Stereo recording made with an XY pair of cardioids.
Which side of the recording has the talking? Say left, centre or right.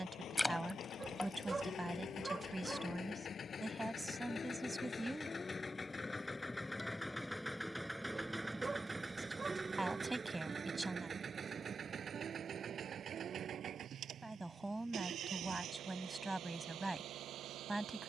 centre.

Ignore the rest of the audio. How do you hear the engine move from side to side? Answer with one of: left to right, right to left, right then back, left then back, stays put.
left to right.